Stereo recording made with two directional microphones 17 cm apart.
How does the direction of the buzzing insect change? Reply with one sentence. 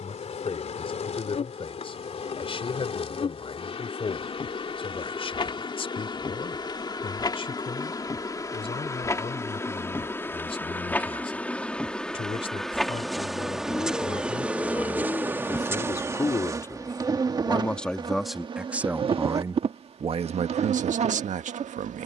You can hear the buzzing insect travel towards the right.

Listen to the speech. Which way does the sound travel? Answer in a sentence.
In this clip you hear the speech move from left to right.